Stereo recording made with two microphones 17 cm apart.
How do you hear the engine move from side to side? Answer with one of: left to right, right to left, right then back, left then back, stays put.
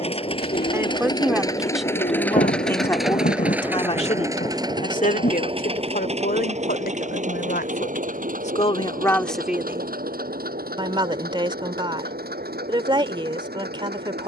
left to right.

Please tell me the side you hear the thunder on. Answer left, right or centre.
left.